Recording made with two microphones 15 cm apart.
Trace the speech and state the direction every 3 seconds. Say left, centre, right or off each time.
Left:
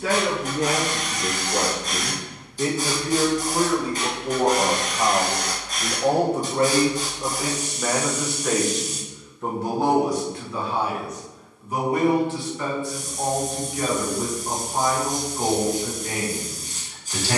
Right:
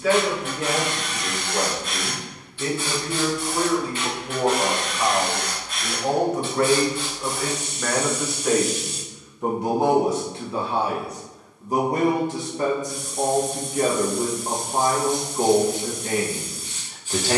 left, left, centre, right, right, right.